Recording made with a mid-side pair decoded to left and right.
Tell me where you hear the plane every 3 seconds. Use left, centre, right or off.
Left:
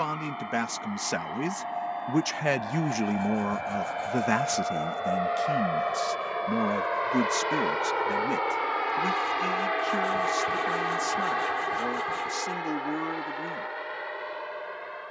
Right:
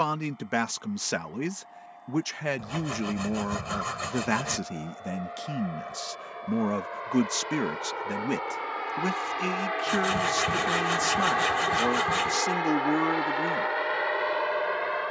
left, left, left, centre, right.